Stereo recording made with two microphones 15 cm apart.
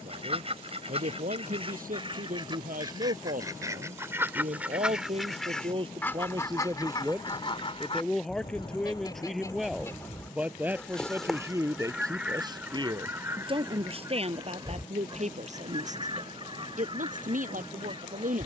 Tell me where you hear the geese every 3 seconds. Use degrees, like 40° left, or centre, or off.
40° right, 10° right, 30° left, 10° left, 20° right, 30° right.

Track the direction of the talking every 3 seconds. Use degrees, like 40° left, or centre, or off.
70° right, 50° right, 10° right, 10° right, 40° right, 60° right.